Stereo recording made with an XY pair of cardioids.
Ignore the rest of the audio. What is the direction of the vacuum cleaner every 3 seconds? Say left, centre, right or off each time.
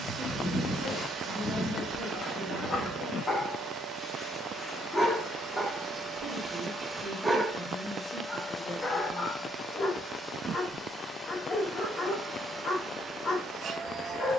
right, right, right, centre, right.